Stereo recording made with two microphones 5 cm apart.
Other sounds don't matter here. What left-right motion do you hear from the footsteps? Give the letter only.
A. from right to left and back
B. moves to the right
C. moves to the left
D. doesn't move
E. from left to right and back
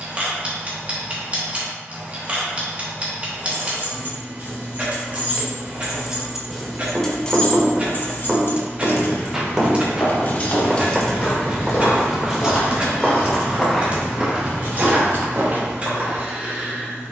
B.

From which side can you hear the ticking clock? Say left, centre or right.
right.